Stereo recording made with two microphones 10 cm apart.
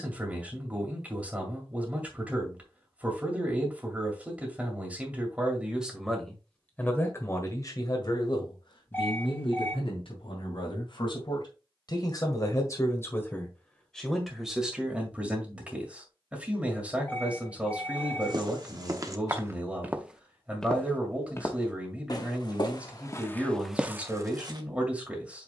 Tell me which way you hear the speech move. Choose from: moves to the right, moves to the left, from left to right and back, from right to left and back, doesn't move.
from right to left and back.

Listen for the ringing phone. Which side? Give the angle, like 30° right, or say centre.
20° left.